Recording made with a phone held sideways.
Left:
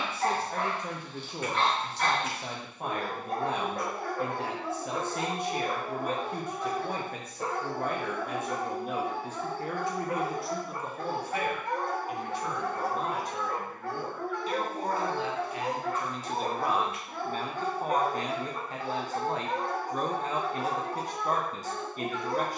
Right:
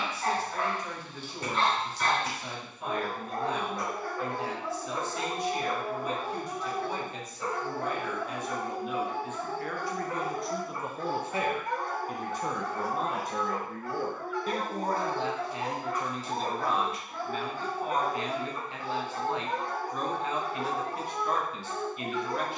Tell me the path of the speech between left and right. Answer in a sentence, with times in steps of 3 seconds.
You can hear the speech on the left from 0 s, in the centre from 9 s, on the right from 12 s, in the centre from 15 s and on the left from 18 s.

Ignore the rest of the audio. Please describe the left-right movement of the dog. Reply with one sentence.
In this clip you hear the dog stay put.